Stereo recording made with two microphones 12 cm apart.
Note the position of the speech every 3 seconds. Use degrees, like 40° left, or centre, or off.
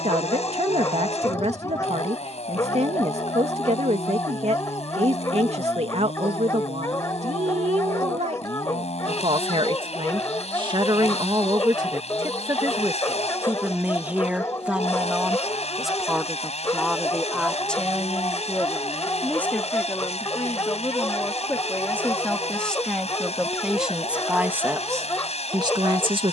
60° right, 60° right, 60° right, 40° right, 20° right, centre, 10° left, 10° left, 30° right.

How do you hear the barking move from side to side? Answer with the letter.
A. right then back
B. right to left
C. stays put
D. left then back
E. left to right
C.